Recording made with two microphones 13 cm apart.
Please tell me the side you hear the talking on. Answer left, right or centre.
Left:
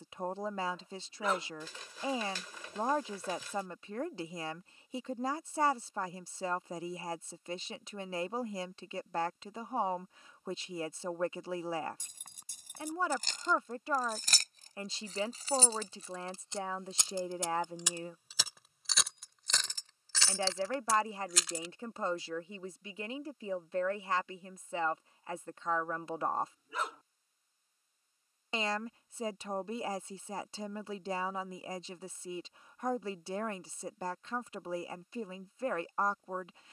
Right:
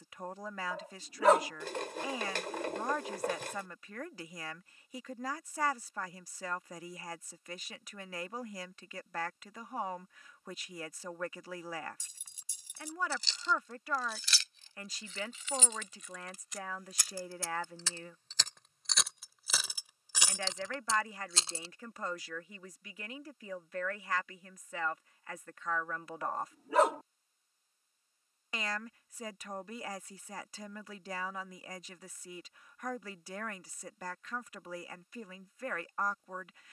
left.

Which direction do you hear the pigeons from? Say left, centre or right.
right.